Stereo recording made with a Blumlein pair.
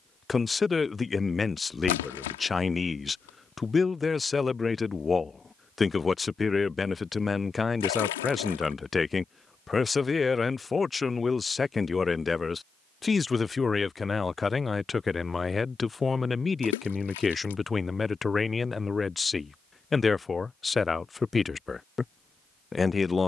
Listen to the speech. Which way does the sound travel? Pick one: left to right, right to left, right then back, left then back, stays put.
stays put.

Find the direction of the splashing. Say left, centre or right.
left.